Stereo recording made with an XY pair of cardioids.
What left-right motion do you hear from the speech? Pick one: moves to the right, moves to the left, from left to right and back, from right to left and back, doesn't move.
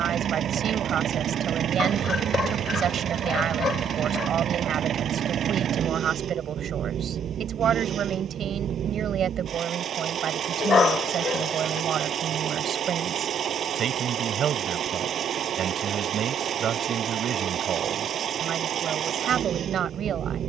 doesn't move.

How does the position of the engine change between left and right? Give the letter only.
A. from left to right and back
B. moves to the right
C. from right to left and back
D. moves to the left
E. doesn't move
E.